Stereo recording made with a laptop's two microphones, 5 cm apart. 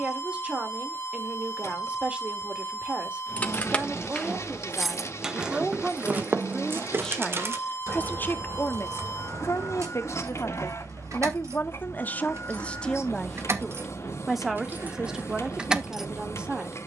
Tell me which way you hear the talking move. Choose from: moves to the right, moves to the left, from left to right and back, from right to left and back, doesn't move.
from right to left and back.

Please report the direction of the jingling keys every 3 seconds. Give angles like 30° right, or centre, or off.
off, centre, 50° right, 70° right, 50° right, 10° right.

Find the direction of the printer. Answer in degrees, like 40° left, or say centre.
60° left.